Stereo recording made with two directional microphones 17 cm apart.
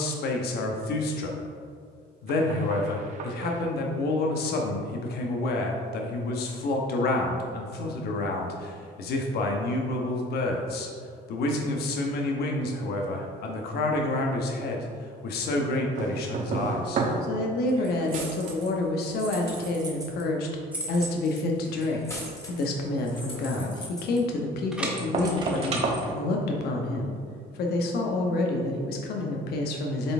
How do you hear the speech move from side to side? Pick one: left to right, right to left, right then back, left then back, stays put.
stays put.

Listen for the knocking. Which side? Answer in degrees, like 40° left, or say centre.
50° right.